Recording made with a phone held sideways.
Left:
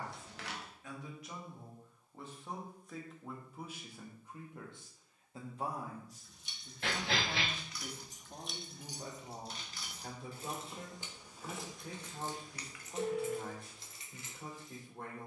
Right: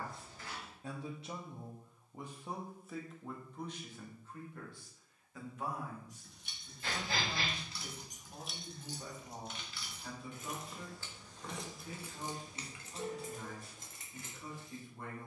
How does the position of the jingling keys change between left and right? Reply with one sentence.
In this clip you hear the jingling keys go left and come back.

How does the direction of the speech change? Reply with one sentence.
In this clip you hear the speech move from right to left.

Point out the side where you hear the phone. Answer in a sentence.
In this clip you hear the phone on the left.